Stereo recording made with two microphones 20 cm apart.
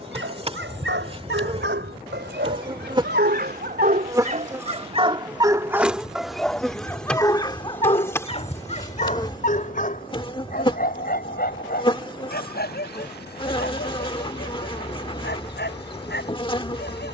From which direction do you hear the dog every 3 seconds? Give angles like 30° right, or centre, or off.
70° right, 40° right, 20° left, 50° left, 60° left, 60° left.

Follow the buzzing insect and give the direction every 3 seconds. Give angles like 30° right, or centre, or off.
30° right, 20° right, 10° left, 20° left, 30° left, 30° left.